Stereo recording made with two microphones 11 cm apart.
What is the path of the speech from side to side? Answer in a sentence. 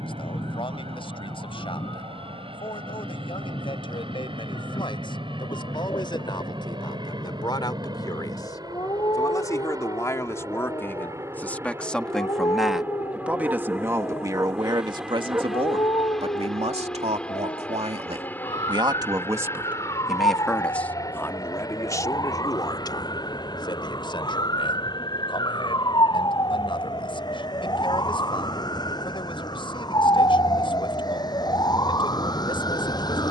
You can hear the speech move from left to right and back again.